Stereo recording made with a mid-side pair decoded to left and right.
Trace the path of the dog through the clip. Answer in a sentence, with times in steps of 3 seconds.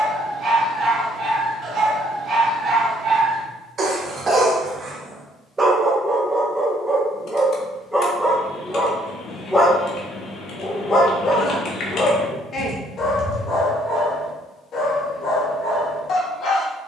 You can hear the dog on the right from 0 s, in the centre from 6 s and on the left from 9 s.